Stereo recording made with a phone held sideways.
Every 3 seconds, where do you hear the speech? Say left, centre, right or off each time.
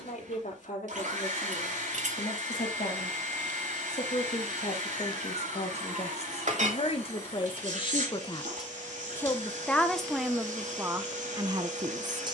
left, left, left, centre.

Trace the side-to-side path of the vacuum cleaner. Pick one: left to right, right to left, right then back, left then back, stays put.
stays put.